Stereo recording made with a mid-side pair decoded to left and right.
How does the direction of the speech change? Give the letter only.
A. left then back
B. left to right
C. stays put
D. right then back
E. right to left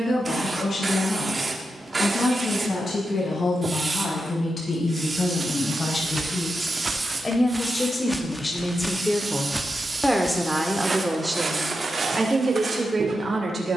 B.